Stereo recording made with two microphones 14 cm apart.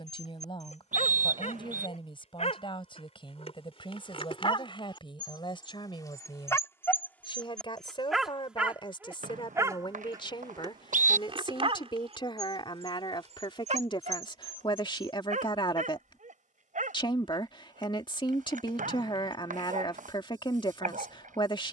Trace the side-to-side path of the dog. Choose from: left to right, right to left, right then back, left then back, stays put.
left to right.